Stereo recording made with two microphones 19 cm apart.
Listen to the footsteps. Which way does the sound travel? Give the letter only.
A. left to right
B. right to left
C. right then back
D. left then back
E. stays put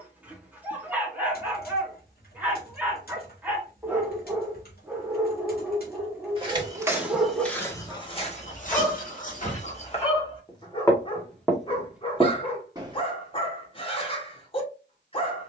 D.